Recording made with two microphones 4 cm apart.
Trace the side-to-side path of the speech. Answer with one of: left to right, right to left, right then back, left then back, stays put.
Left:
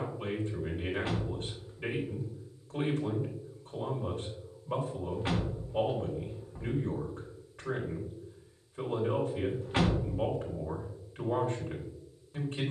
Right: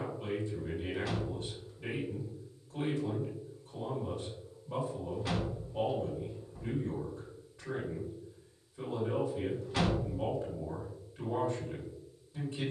stays put.